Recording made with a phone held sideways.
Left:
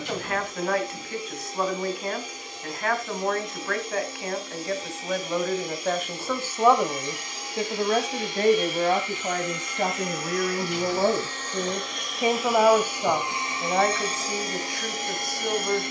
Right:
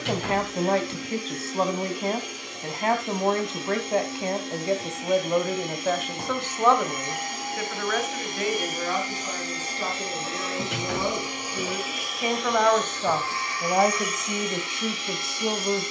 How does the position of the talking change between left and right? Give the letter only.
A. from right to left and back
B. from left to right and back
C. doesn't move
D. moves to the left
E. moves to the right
A.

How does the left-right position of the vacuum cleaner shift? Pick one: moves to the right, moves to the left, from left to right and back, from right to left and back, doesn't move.
moves to the left.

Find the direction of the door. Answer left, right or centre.
right.